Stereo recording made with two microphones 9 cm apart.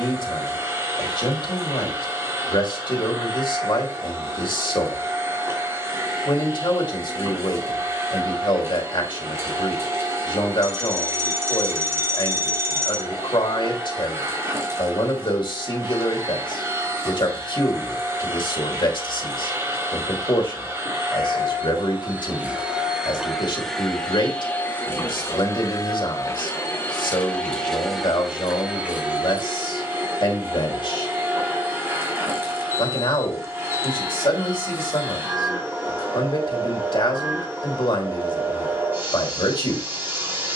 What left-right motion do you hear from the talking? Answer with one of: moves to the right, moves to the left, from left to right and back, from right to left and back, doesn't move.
doesn't move.